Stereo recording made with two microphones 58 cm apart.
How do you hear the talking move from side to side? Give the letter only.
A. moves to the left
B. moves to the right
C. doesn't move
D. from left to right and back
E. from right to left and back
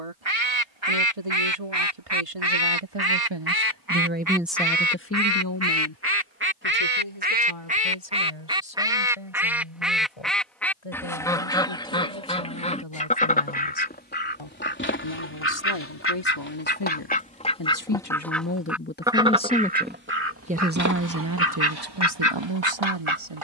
E.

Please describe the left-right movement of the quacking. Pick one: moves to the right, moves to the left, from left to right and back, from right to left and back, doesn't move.
from right to left and back.